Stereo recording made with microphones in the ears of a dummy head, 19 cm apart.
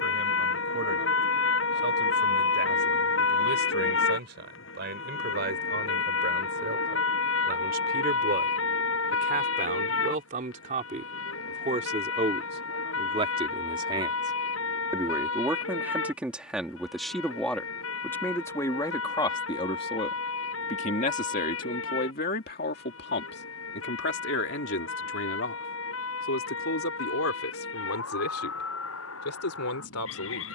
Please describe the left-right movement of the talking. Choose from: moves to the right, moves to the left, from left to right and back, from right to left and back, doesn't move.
moves to the left.